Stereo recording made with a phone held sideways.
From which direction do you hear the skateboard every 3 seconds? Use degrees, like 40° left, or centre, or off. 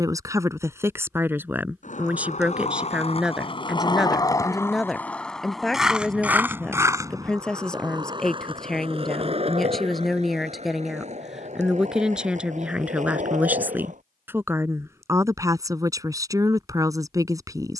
50° left, 20° left, 20° right, 50° right, 50° right, off.